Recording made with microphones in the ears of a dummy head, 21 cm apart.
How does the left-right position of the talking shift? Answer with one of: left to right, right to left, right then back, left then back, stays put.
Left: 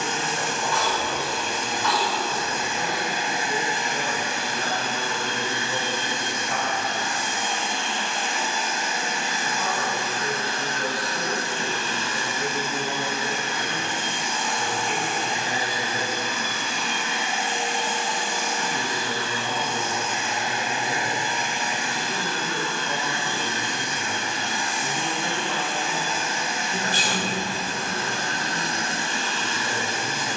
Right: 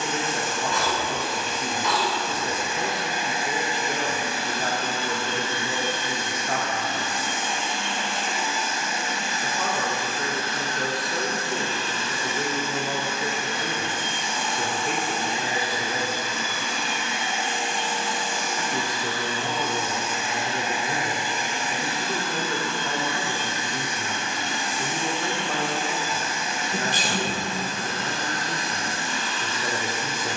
stays put.